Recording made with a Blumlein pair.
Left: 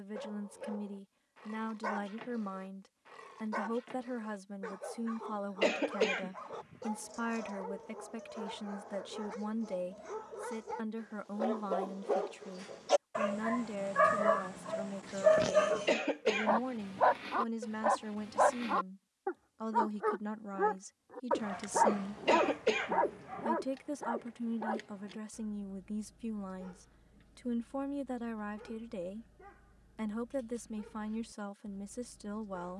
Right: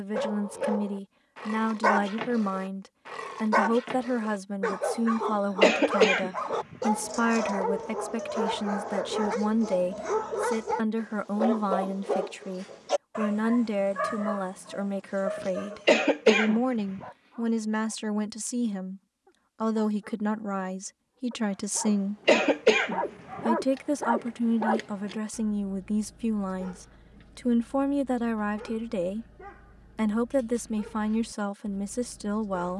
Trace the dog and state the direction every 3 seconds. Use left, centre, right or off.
right, right, right, right, centre, left, left, centre, right, right, right.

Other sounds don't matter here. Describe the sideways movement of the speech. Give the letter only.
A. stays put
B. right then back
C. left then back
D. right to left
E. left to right
A.